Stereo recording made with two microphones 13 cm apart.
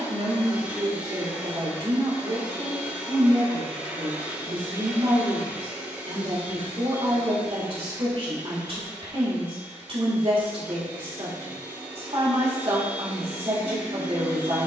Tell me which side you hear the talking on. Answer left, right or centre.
right.